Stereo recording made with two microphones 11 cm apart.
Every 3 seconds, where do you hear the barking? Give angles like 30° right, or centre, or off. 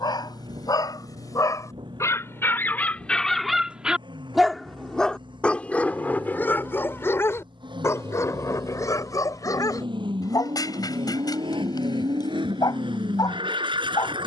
30° left, centre, 20° left, 40° left, 40° left.